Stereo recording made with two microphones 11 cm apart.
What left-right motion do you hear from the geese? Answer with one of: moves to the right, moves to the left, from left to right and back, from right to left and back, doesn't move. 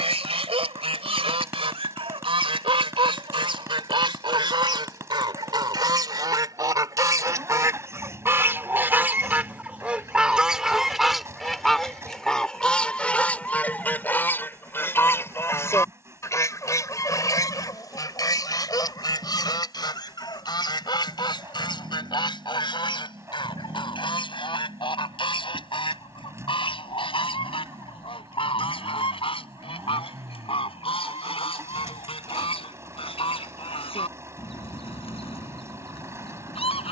moves to the left.